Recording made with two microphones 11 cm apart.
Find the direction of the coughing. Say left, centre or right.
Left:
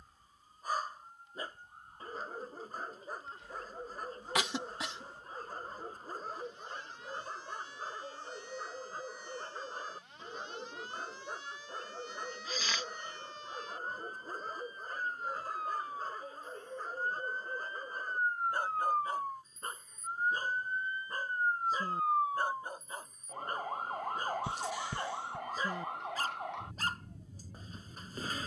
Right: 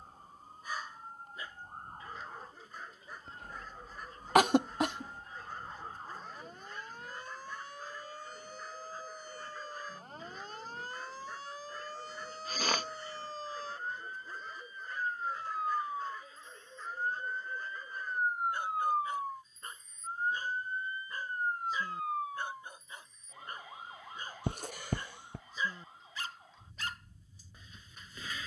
right.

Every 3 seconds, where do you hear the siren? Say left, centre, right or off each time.
right, right, right, right, right, right, centre, left, left, left.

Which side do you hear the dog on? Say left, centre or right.
left.